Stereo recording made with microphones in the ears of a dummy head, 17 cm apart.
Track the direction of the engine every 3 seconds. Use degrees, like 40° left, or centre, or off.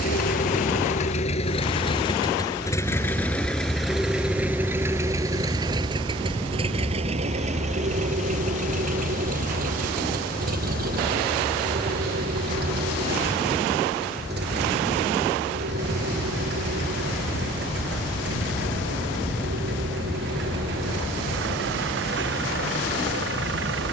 30° left, 10° right, 40° right, 50° right, 60° right, 60° right, 60° right, 70° right.